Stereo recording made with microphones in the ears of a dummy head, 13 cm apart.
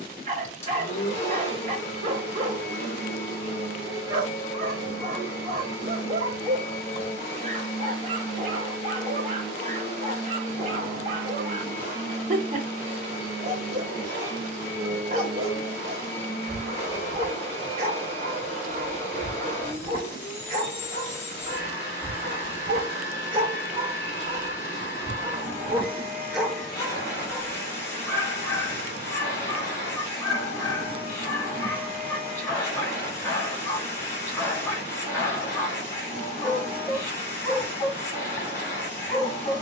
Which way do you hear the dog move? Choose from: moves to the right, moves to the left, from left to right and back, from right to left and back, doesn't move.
moves to the left.